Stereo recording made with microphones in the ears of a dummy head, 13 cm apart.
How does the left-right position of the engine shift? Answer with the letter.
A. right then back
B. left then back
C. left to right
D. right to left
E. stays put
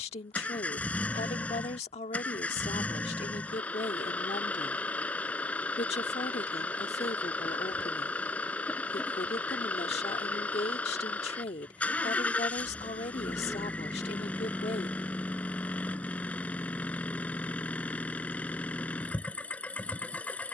E.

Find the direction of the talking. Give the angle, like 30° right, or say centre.
50° left.